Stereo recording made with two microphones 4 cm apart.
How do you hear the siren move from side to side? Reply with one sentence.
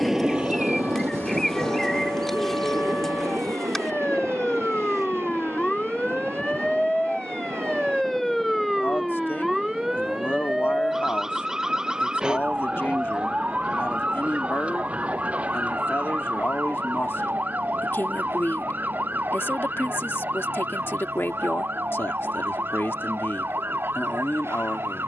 In this clip you hear the siren travel towards the right.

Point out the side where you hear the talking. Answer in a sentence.
In this clip you hear the talking on the left.